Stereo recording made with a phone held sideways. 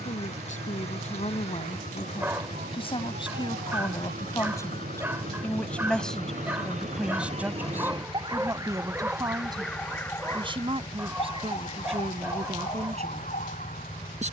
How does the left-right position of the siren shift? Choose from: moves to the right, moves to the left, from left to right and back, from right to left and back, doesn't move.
moves to the left.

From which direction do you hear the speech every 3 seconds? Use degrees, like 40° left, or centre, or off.
50° left, 20° left, 10° right, 30° right, 40° right.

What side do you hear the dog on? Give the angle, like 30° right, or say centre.
10° right.